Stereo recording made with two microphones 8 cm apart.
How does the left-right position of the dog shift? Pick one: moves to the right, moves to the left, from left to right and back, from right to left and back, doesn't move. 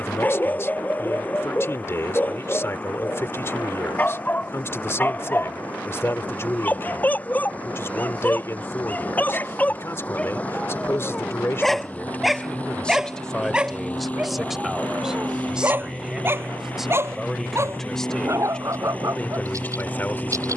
moves to the right.